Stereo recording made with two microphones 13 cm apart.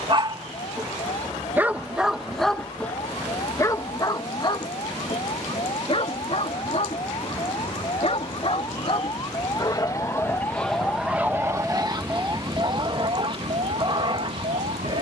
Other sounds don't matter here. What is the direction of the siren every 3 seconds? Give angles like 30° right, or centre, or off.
50° left, 50° left, 40° left, 20° left, 50° right.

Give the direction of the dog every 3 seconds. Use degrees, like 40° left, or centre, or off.
10° right, 30° left, 50° left, centre, 40° right.